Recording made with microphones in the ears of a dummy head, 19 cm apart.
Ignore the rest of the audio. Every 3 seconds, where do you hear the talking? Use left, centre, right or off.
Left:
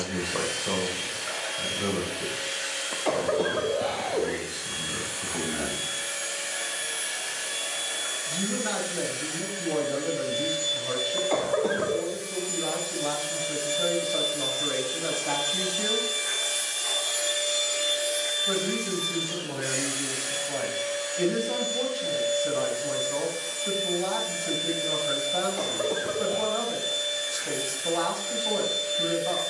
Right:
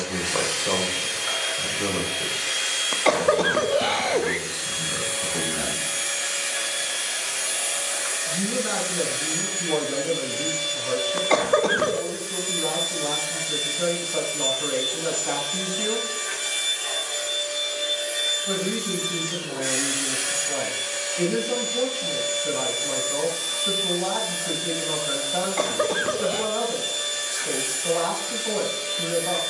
right, centre, centre, centre, centre, centre, centre, centre, centre, centre.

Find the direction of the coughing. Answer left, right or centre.
right.